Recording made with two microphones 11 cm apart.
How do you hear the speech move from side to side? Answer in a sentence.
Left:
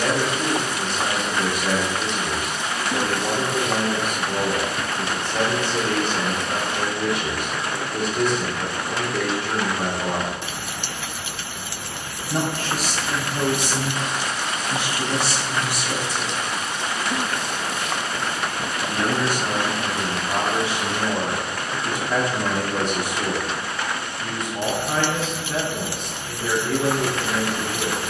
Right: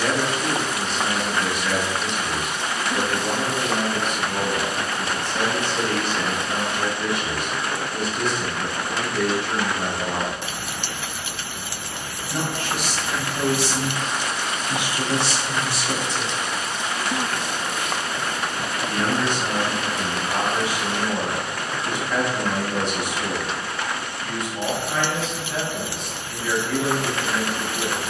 In this clip you hear the speech move from left to right and back again.